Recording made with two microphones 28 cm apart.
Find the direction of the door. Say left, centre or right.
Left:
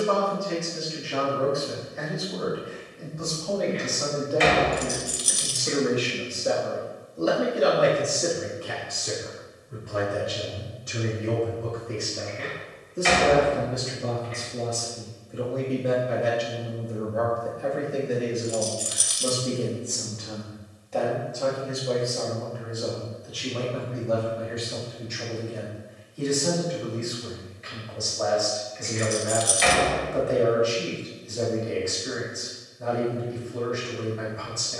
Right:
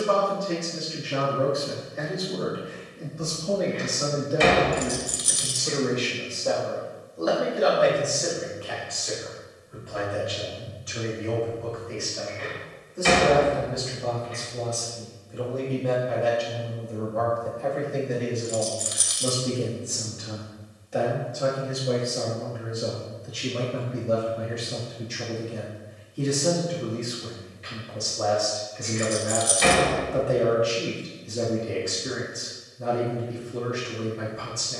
right.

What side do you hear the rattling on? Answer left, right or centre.
left.